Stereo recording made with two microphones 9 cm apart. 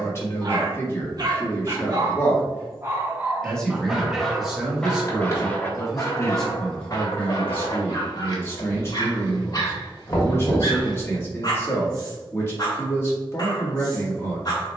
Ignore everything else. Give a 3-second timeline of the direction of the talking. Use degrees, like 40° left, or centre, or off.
30° left, centre, 20° left, 30° left, 30° left.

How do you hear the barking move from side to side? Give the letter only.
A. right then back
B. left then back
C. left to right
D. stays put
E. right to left
E.